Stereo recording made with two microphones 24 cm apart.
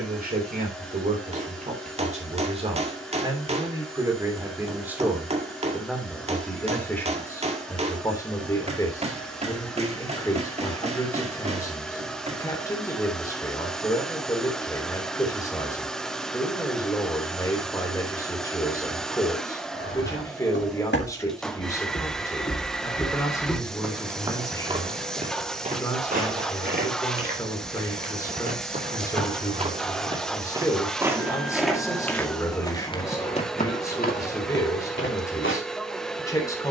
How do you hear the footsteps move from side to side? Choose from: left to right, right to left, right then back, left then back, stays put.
right then back.